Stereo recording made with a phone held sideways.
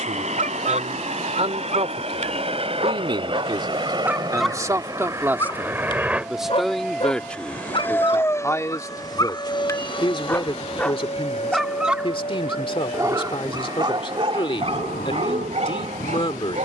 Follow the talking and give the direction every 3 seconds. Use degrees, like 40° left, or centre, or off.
50° right, 20° right, 10° left, 30° left, 40° left, 40° left.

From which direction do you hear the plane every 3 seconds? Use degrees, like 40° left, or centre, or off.
50° right, 30° right, 10° left, 40° left, 50° left, 60° left.